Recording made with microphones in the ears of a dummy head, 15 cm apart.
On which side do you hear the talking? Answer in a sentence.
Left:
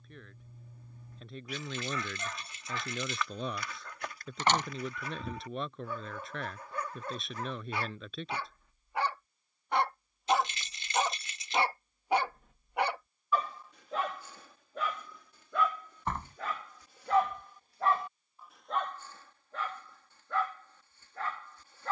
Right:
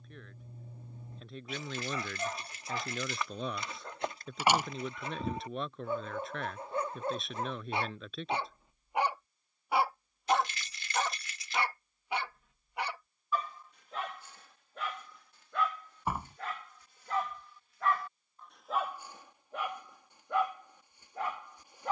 You can hear the talking in the centre.